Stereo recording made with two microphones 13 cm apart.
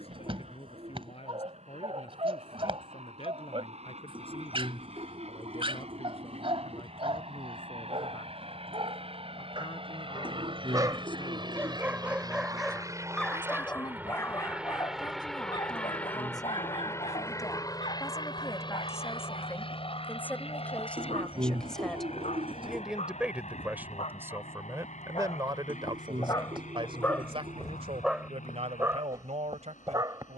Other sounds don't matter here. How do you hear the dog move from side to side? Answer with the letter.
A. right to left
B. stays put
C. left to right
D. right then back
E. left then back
E.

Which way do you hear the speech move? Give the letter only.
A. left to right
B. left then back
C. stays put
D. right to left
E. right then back
A.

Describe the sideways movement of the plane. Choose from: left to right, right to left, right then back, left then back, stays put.
right to left.